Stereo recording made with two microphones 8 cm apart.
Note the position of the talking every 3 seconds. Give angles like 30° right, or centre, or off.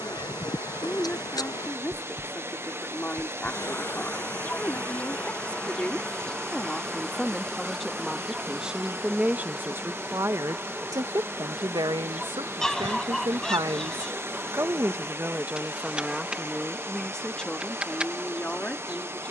20° left, 20° left, centre, 40° right, 60° right, centre, 20° left.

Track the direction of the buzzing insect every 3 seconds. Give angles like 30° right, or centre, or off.
50° left, 20° left, centre, 10° right, 10° right, 10° right, 10° right.